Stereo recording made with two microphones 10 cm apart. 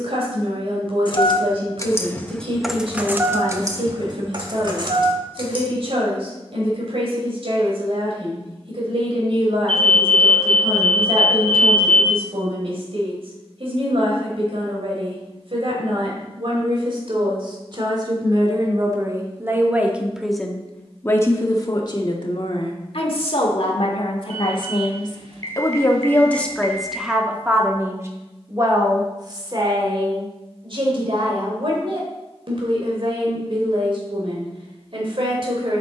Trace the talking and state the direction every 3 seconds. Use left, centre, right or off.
right, right, right, right, right, right, right, left, left, right, right, right.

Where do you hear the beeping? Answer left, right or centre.
right.